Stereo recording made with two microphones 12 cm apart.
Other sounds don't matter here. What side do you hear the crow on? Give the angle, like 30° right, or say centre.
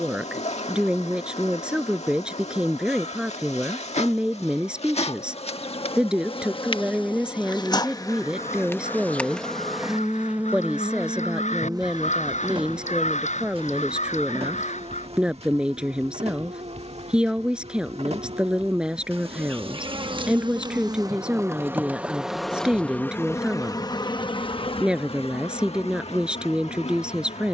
80° left.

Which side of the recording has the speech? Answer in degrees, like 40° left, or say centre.
10° right.